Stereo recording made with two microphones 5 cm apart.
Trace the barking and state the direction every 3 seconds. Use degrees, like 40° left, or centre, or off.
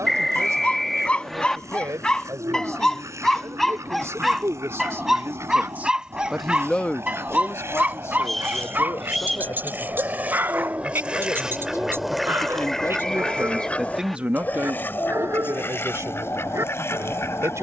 20° left, centre, 30° right, 40° right, 50° right, 60° right.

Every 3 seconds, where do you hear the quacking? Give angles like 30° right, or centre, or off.
70° right, 70° right, 60° right, 30° right, 20° left, 50° left.